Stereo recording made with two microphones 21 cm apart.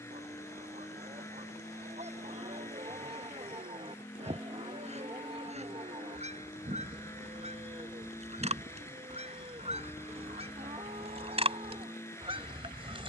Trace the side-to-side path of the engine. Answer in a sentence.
In this clip you hear the engine stay put.